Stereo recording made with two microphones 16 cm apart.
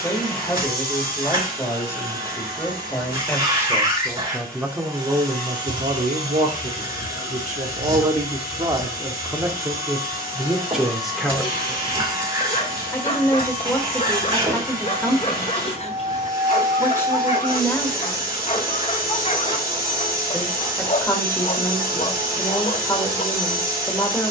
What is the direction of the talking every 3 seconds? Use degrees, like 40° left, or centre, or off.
20° left, 10° right, 50° right, 10° right, 20° left, 20° left, 20° left, 20° left.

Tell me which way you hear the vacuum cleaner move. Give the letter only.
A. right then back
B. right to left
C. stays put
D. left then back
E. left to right
C.